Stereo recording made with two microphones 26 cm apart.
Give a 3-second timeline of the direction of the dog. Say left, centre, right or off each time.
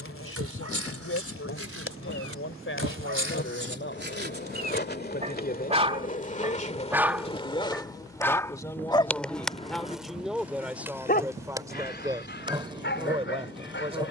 right, right, centre, left, left.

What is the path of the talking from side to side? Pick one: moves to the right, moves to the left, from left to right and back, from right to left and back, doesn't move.
moves to the right.